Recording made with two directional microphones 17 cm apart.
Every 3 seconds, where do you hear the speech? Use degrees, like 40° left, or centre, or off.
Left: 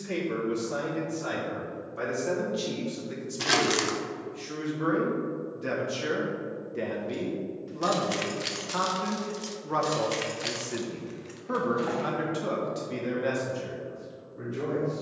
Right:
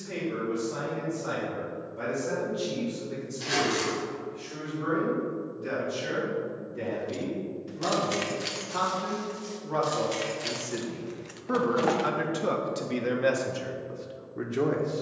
60° left, 60° left, 40° left, 10° left, 30° right.